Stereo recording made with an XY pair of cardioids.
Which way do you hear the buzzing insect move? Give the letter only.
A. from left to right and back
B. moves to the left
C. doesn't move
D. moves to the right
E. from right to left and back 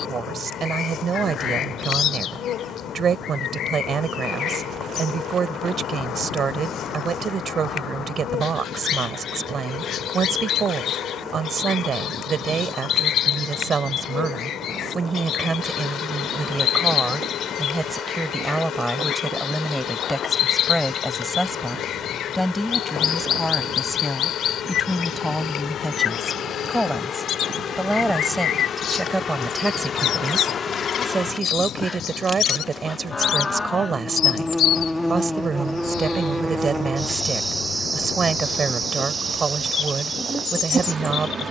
D.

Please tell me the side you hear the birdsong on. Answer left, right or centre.
left.